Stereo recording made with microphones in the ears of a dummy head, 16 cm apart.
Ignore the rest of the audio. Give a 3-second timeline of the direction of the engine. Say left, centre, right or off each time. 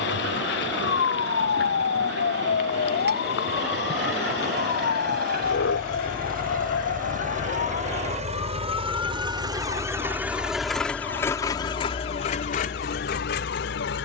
right, right, right, centre, left.